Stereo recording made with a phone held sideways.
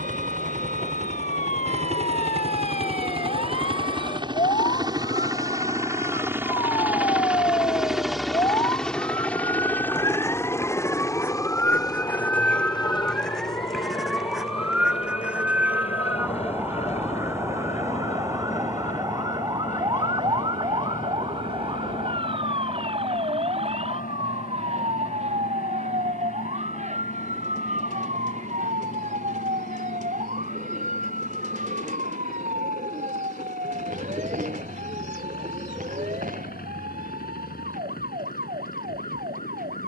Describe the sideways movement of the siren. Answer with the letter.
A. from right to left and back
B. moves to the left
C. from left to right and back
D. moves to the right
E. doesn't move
D.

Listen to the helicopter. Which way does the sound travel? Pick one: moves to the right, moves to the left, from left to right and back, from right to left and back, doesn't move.
moves to the left.